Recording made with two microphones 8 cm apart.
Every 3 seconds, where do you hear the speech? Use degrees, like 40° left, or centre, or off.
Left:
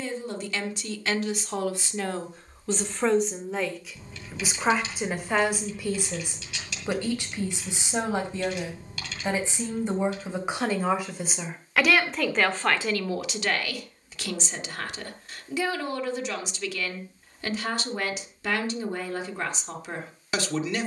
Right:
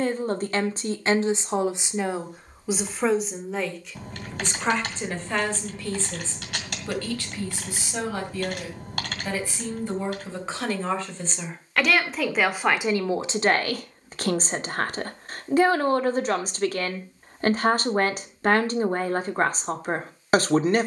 30° right, 10° left, 20° left, 20° left, 30° right, 50° right, 50° right.